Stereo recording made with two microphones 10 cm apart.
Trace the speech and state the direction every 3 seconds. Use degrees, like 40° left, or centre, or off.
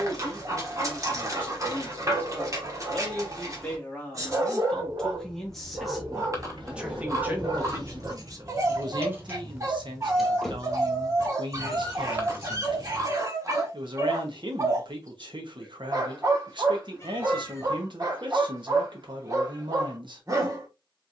20° left, 10° left, 30° right, 60° right, 60° right, 60° right, 60° right.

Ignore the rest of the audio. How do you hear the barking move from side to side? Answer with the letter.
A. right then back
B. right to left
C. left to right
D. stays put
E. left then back
D.